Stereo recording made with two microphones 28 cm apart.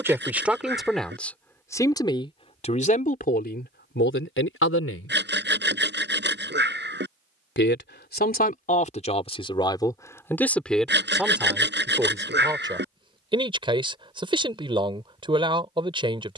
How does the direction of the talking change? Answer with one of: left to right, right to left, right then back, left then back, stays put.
left then back.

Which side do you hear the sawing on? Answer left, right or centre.
right.